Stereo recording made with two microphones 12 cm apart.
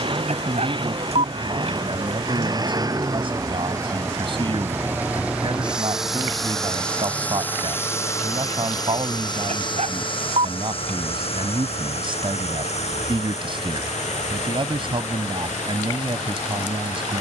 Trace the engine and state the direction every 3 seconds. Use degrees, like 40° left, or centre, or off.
40° right, 20° right, 20° left, 50° left, 70° left, 80° left.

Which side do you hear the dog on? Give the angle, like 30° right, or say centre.
70° right.